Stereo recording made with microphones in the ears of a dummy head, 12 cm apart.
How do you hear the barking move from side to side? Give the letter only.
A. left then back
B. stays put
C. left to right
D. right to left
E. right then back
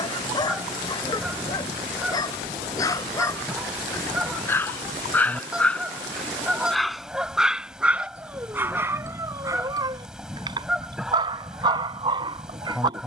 C.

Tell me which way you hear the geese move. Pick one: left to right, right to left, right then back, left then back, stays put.
stays put.